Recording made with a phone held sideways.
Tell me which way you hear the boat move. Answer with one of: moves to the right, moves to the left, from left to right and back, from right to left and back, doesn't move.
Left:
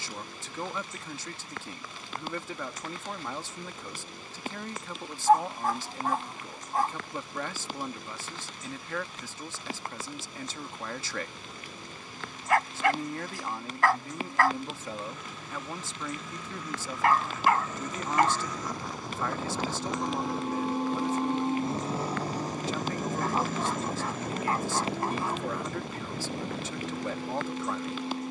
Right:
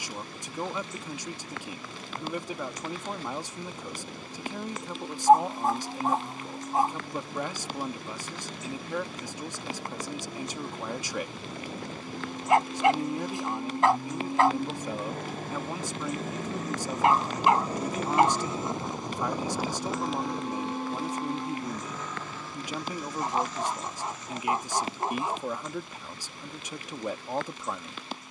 moves to the left.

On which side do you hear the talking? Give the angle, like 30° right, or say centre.
20° right.